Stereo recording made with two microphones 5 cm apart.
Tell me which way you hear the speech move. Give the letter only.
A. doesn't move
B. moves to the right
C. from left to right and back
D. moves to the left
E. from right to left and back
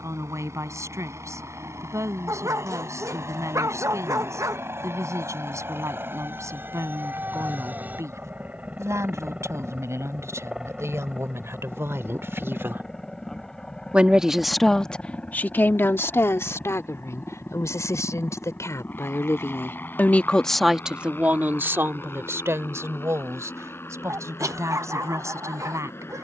E.